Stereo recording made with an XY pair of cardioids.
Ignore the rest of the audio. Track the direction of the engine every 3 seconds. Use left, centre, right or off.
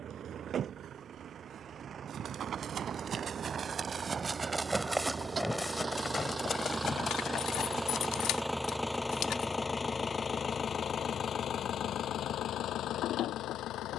right, right, centre, left, left.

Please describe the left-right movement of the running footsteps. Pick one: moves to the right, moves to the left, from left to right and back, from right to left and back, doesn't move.
moves to the left.